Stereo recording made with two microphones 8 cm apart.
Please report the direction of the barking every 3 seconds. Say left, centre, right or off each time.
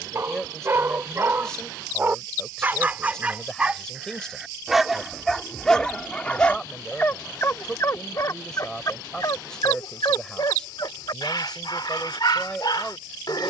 right, centre, left, left, left.